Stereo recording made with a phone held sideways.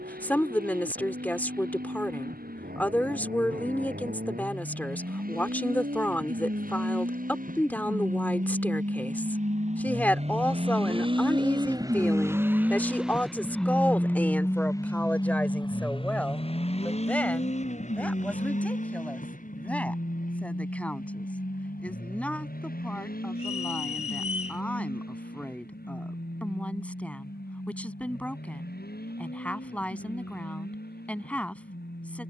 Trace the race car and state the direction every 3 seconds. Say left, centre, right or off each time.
right, right, right, right, centre, left, left, left, left, left, left.